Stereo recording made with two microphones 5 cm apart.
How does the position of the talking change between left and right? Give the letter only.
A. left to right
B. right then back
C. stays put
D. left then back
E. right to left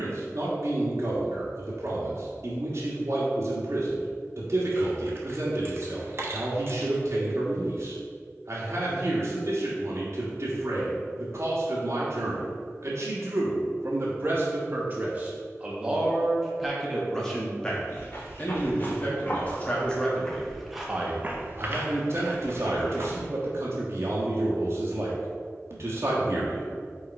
D.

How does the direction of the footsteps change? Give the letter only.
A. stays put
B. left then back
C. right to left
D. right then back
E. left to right
E.